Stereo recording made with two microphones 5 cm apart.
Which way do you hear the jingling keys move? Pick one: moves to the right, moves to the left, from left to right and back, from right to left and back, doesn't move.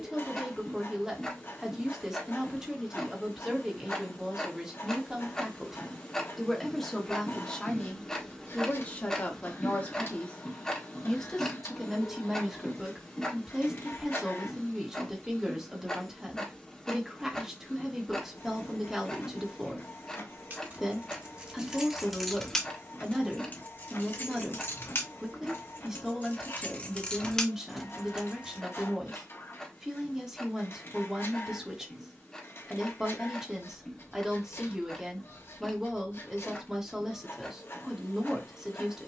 from right to left and back.